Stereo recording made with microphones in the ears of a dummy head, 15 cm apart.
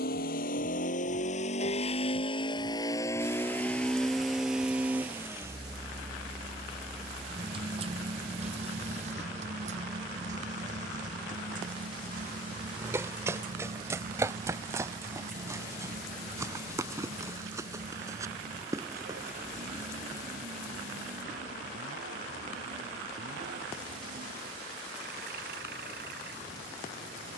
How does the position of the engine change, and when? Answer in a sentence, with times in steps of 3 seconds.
In this clip you hear the engine on the left from 0 s, in the centre from 3 s and on the right from 6 s.